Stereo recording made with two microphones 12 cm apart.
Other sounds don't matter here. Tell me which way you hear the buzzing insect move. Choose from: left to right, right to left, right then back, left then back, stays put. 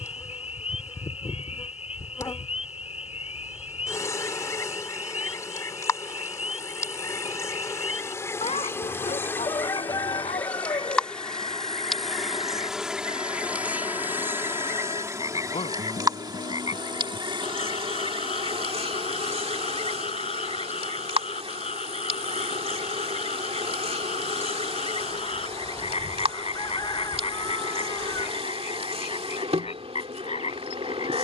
left to right.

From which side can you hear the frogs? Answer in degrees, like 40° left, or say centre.
60° left.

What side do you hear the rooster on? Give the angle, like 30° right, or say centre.
30° left.